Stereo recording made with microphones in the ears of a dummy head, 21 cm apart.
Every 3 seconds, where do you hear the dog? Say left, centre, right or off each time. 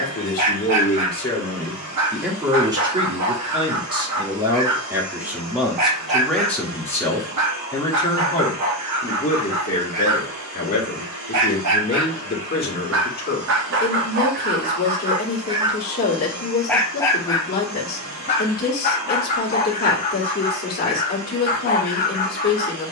right, right, right, right, right, centre, left, left.